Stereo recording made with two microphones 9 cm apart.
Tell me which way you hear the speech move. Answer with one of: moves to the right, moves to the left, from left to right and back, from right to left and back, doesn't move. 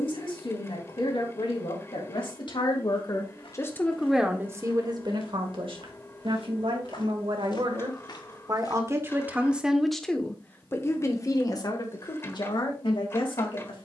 from left to right and back.